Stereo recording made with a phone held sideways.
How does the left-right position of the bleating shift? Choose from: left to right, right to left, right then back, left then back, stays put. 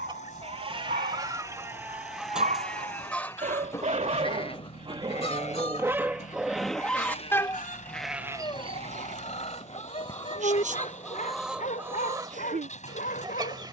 left then back.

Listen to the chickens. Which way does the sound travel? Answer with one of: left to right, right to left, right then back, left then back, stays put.
left then back.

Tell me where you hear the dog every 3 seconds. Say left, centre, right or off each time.
right, right, centre, left, left.